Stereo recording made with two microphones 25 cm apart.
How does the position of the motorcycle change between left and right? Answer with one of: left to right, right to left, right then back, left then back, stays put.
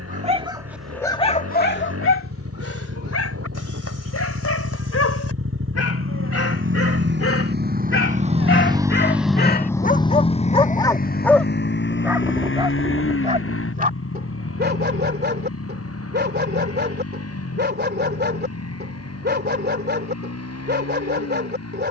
right to left.